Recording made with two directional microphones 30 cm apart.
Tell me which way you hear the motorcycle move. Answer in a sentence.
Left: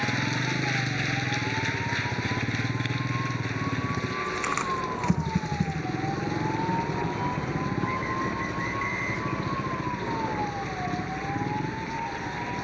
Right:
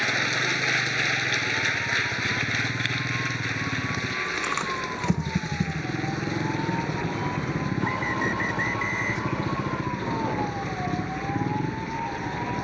In this clip you hear the motorcycle move from left to right.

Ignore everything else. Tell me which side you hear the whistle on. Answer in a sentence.
In this clip you hear the whistle on the right.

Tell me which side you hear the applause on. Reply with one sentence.
In this clip you hear the applause on the right.